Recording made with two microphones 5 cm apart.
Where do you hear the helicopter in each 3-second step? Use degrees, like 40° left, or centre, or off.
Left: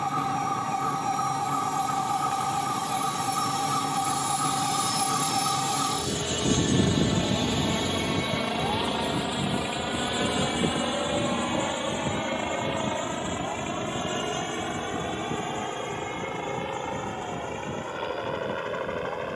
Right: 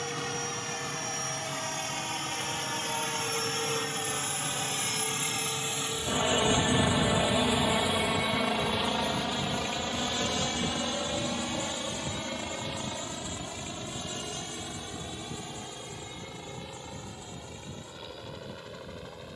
60° right, 40° right, 10° right, 20° left, 40° left, 50° left, 50° left.